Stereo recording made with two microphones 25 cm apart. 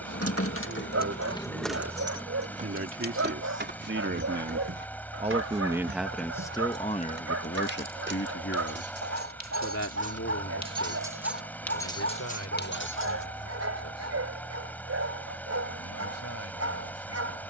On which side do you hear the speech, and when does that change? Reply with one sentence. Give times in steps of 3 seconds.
In this clip you hear the speech on the right from 0 s and on the left from 6 s.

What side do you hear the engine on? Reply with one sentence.
You can hear the engine in the centre.